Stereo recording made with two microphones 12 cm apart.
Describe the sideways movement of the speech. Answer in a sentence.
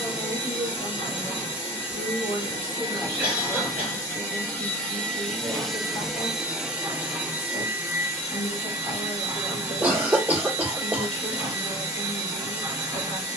You can hear the speech stay in one place.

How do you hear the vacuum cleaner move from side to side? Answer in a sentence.
In this clip you hear the vacuum cleaner travel towards the right.